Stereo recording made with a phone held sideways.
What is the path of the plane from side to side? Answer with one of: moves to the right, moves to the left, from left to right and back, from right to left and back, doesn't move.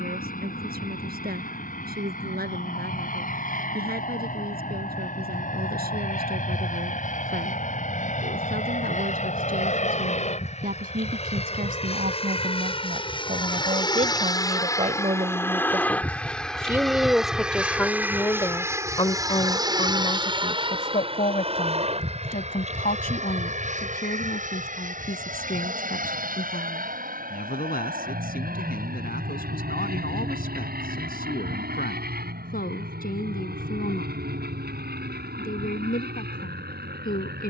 moves to the right.